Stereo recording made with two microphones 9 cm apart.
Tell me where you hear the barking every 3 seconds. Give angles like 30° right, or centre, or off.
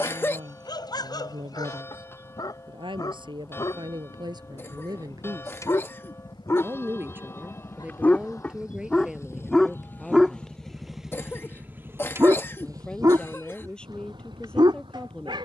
50° left, 40° left, 20° left, 10° right, 50° right.